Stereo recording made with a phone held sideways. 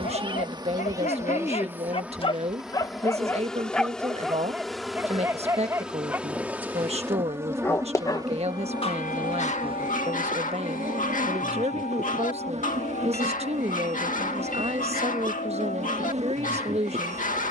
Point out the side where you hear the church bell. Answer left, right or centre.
left.